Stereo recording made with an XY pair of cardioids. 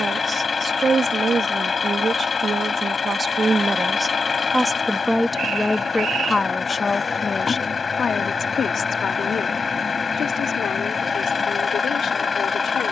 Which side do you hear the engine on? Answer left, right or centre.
left.